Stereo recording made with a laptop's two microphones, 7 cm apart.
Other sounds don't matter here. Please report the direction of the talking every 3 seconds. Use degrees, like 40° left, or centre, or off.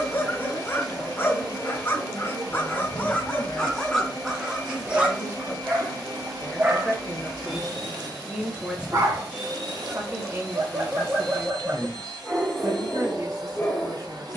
50° left, 30° left, centre, 40° right, 60° right.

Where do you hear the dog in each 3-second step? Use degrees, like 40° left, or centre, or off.
30° left, centre, 40° right, 30° right, 20° left.